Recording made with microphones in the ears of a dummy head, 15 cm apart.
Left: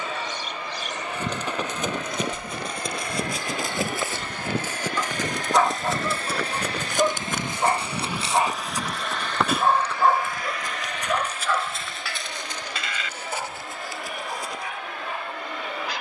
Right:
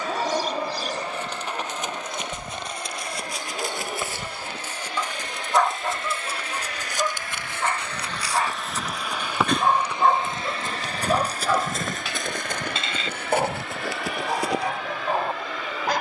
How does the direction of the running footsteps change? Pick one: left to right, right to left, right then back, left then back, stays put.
left to right.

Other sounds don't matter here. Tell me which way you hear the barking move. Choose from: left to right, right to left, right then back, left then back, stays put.
left then back.